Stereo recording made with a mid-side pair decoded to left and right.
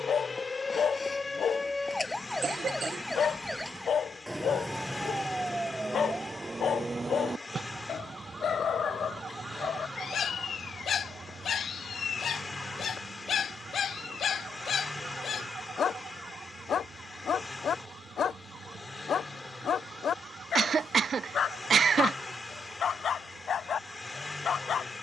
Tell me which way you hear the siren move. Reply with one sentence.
In this clip you hear the siren move from left to right.